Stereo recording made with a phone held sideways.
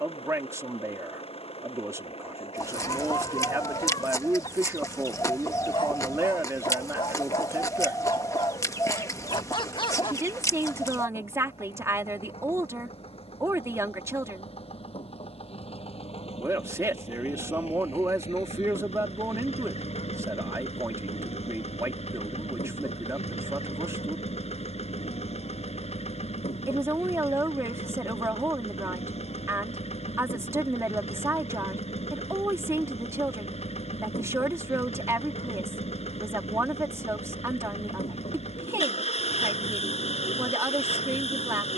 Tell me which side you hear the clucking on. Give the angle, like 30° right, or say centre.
20° left.